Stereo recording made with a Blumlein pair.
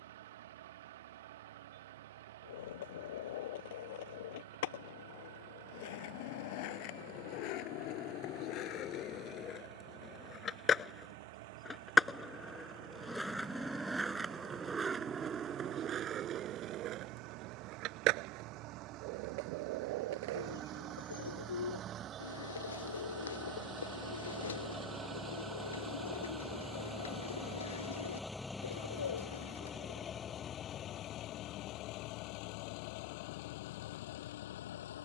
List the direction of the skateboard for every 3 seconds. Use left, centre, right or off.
left, left, left, left, centre, right, right, off, off, off, off, off.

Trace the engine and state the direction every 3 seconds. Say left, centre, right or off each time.
right, right, right, right, right, right, right, right, centre, centre, left, left.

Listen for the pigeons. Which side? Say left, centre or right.
left.